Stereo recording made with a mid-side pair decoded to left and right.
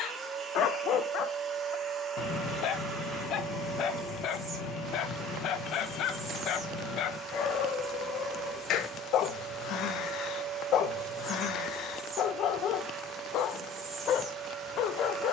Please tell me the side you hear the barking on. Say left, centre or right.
left.